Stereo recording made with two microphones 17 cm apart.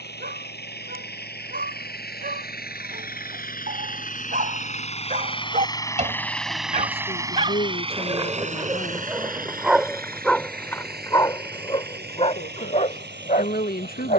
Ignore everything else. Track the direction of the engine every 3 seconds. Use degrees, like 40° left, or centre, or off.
70° left, 40° left, 20° right, 60° right, 70° right.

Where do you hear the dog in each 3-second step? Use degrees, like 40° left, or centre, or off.
60° right, 50° right, 30° right, 10° left, 50° left.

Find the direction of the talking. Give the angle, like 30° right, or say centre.
60° left.